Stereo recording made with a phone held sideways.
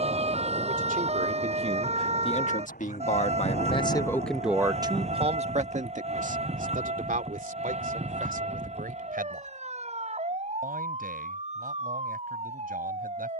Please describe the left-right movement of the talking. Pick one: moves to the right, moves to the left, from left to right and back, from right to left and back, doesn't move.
from right to left and back.